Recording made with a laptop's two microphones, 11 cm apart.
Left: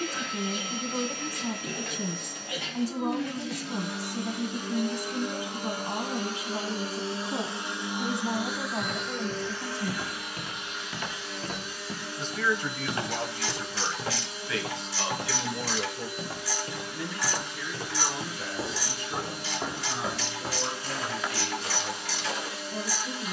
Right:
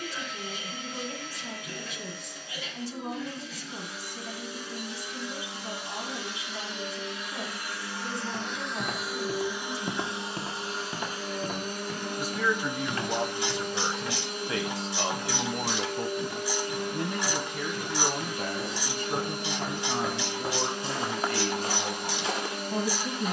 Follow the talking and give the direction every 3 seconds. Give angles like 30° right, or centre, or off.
40° left, 40° left, 40° left, 20° left, 20° right, 50° right, 50° right, 50° right.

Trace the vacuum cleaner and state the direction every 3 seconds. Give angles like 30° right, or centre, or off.
60° left, 60° left, 20° left, 30° right, 50° right, 50° right, 50° right, 50° right.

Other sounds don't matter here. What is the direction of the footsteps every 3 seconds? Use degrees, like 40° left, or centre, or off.
off, off, 70° right, 30° right, 30° left, 40° left, 10° left, 50° right.